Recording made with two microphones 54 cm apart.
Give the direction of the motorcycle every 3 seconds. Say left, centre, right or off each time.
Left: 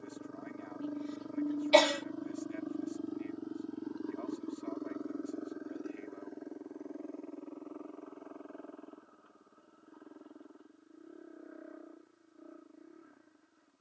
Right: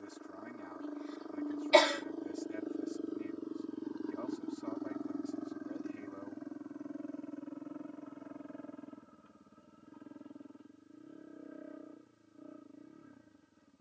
left, centre, right, right, right.